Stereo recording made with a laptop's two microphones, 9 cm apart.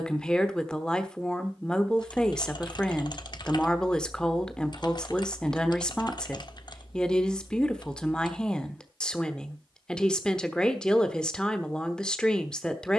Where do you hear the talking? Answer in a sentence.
You can hear the talking in the centre.